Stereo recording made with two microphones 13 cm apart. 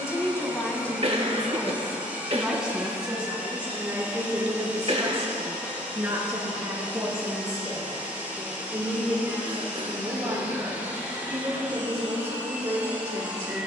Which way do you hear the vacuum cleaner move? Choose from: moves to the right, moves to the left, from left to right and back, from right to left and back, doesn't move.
doesn't move.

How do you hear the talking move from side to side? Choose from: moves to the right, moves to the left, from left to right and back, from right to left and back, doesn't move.
moves to the right.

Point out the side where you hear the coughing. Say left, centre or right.
right.